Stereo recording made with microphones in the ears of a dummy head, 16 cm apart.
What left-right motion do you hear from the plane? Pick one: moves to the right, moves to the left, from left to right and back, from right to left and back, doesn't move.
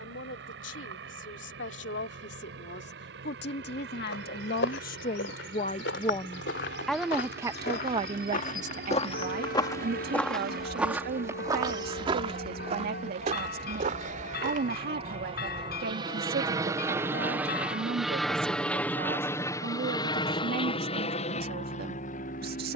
moves to the left.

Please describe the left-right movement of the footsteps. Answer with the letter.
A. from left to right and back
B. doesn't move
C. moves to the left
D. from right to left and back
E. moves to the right
E.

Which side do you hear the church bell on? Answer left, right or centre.
left.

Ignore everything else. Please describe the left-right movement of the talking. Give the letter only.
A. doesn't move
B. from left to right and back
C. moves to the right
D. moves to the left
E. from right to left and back
C.